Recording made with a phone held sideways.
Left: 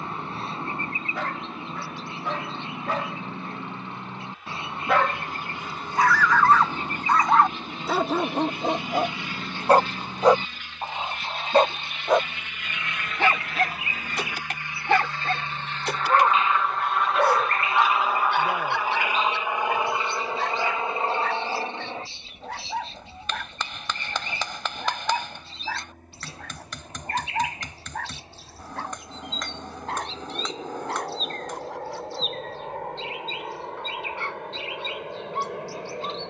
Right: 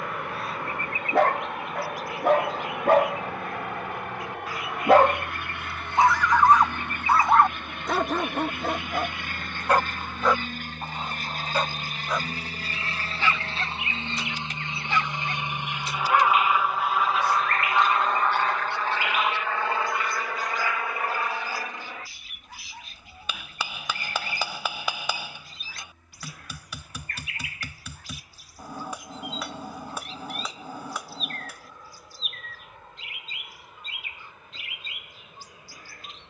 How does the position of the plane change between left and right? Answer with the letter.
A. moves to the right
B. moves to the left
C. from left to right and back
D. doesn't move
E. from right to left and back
B.